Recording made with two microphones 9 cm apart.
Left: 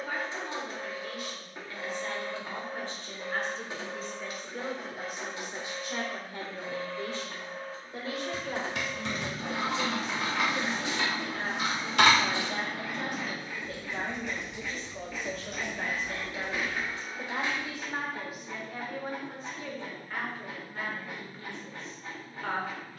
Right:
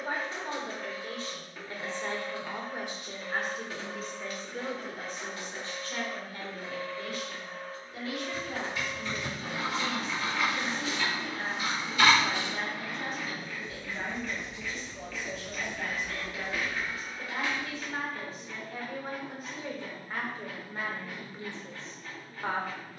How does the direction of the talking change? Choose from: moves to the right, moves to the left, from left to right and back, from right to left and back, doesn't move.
from right to left and back.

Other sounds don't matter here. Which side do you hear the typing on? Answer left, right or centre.
left.